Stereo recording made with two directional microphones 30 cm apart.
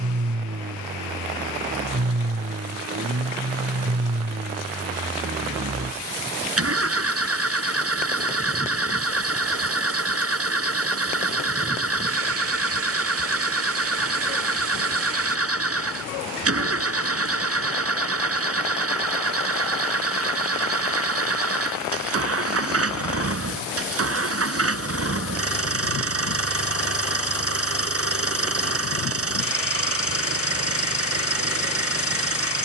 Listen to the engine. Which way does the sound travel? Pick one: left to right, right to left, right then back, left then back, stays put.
stays put.